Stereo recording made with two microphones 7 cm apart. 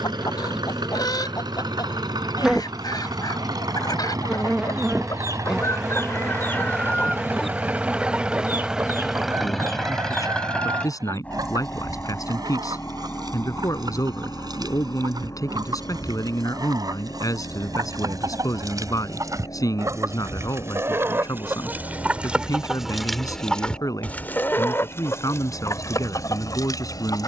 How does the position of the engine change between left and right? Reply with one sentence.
You can hear the engine move to the left.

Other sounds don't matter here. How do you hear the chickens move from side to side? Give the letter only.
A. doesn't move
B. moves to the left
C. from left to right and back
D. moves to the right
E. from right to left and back
C.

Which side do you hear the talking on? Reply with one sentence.
In this clip you hear the talking on the left.